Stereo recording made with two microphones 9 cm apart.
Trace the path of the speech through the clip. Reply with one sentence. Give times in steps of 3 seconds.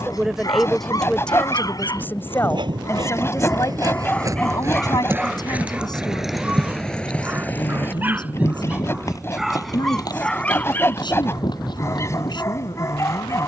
You can hear the speech in the centre from 0 s and on the left from 3 s.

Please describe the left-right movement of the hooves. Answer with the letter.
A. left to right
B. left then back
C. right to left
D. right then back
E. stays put
C.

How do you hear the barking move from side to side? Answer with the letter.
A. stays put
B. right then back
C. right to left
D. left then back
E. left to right
B.